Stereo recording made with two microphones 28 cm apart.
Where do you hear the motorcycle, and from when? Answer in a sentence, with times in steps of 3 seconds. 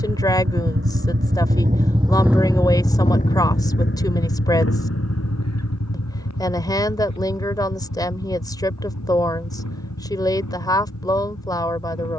In this clip you hear the motorcycle on the right from 0 s and on the left from 3 s.